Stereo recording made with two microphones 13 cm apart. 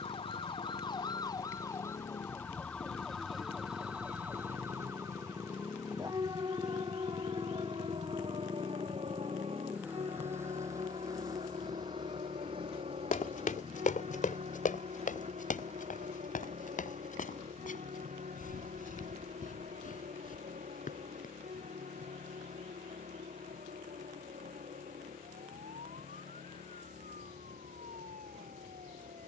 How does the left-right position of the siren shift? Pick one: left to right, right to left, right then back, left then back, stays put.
left to right.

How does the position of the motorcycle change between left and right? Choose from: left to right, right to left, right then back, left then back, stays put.
left to right.